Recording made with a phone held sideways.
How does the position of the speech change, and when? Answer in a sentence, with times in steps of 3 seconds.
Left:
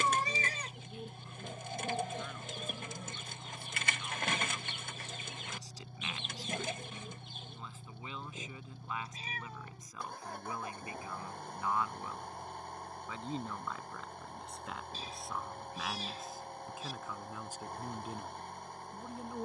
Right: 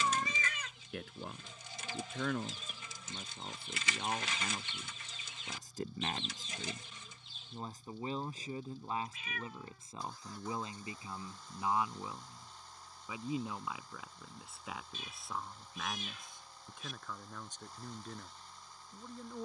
In this clip you hear the speech on the right from 0 s and in the centre from 12 s.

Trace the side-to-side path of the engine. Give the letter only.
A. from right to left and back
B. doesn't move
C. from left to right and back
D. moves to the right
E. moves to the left
B.